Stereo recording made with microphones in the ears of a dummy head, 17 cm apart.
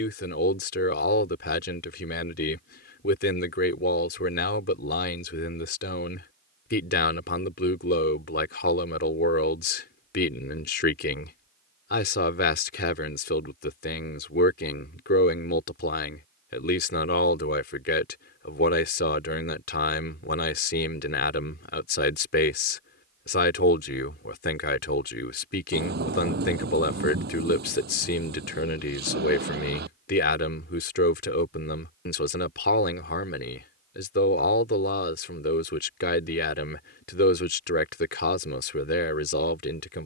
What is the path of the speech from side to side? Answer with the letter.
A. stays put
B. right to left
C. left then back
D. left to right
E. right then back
A.